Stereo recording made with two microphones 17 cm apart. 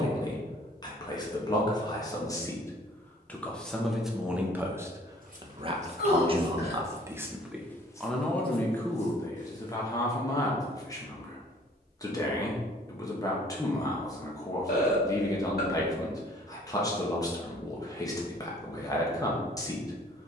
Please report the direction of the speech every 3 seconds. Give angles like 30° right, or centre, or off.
20° left, 10° right, 10° right, 20° left, 20° left, 20° left, 20° left.